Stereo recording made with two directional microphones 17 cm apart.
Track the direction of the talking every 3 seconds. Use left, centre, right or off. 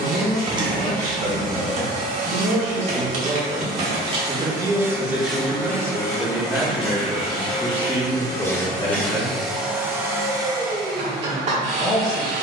right, right, centre, left.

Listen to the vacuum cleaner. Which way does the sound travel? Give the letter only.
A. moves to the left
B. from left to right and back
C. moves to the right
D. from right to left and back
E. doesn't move
D.